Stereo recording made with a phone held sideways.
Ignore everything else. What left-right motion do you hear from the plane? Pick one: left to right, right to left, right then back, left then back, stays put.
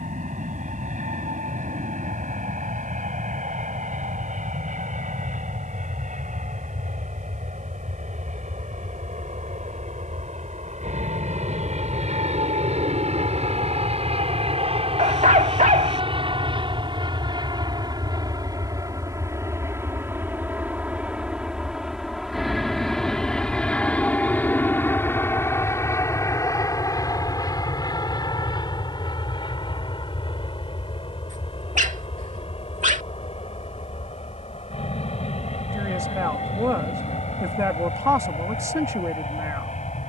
right to left.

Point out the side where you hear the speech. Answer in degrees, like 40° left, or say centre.
20° right.